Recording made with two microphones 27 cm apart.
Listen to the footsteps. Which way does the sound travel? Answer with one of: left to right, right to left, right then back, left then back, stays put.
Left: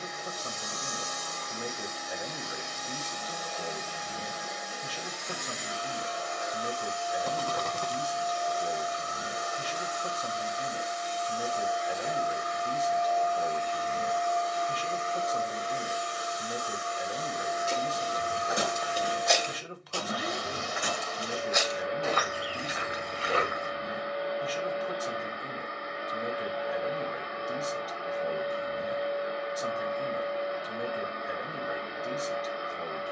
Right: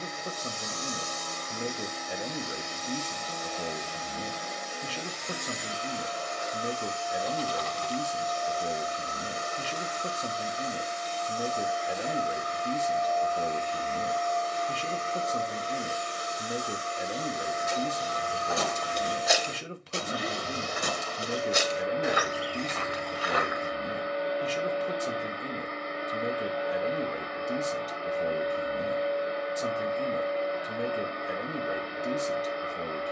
right then back.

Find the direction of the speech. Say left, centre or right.
right.